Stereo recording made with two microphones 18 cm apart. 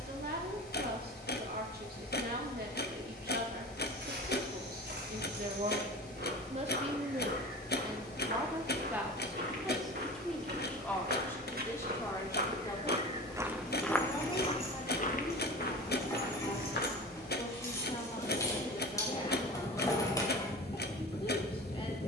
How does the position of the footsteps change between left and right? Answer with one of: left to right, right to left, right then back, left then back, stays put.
right to left.